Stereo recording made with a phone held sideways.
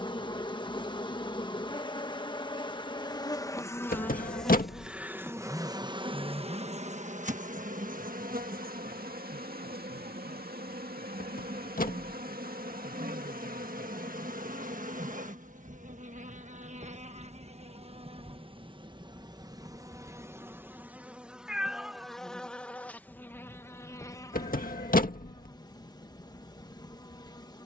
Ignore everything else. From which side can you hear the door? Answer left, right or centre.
left.